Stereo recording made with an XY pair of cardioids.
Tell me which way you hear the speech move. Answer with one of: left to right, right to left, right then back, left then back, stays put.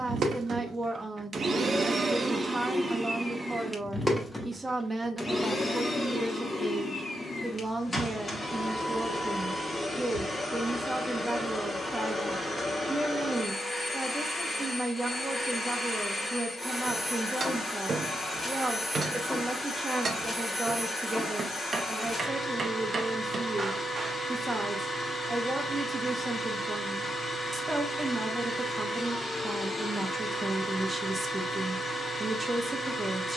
stays put.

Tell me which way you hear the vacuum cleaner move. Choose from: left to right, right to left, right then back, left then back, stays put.
right to left.